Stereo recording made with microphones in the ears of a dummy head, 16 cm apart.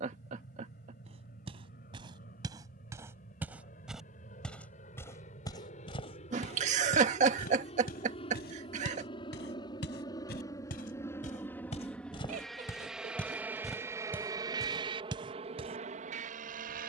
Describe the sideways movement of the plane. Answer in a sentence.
In this clip you hear the plane move from left to right.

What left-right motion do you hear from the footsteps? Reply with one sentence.
In this clip you hear the footsteps go left and come back.